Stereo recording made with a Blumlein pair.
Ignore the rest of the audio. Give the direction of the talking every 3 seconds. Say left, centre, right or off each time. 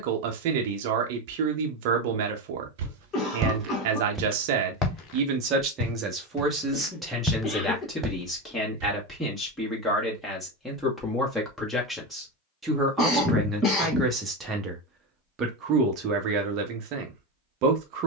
right, right, centre, centre, centre, right.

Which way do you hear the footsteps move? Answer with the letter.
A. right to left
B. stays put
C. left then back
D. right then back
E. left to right
C.